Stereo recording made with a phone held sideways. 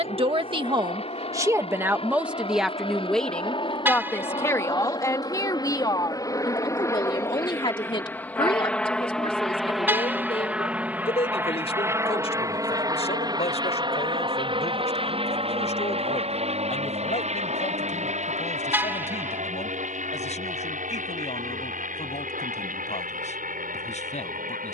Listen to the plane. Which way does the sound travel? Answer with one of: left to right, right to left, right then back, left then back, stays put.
left to right.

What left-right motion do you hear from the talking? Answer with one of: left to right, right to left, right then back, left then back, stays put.
right to left.